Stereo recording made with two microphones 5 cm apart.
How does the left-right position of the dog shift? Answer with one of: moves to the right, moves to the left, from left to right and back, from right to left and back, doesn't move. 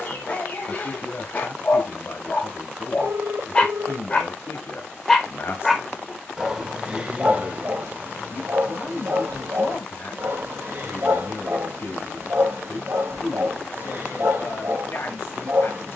moves to the right.